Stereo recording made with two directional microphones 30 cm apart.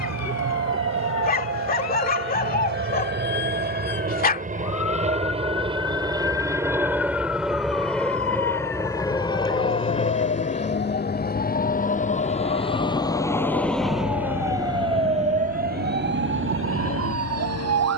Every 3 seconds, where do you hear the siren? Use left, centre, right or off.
left, left, left, left, centre, right.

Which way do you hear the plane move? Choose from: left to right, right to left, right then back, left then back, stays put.
right to left.